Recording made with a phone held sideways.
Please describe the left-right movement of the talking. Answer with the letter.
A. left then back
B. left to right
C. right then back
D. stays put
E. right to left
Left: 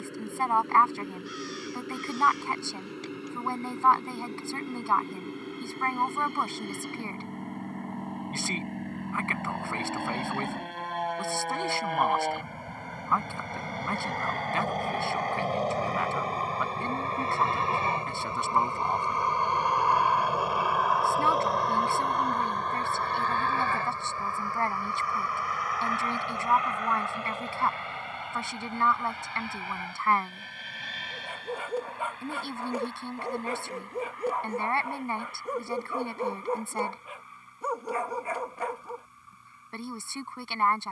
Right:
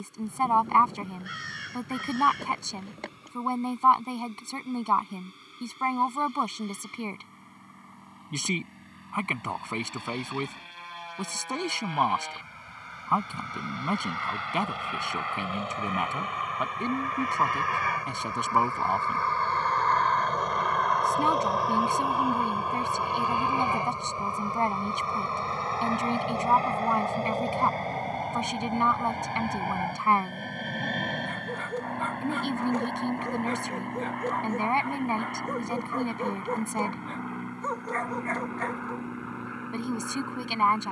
D.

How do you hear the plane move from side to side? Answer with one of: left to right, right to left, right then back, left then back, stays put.
left to right.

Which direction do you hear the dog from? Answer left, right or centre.
centre.